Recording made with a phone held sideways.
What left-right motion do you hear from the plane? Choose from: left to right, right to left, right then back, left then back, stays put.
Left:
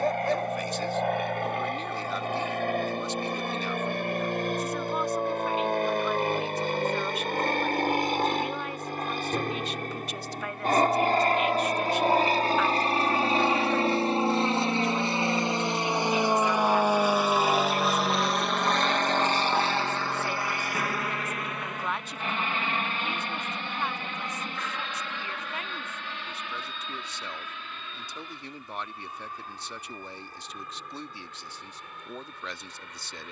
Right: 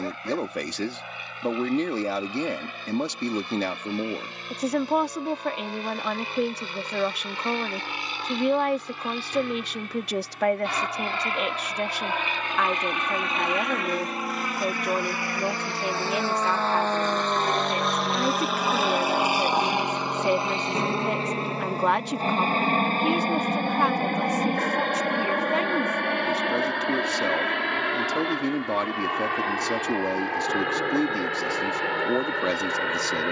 left to right.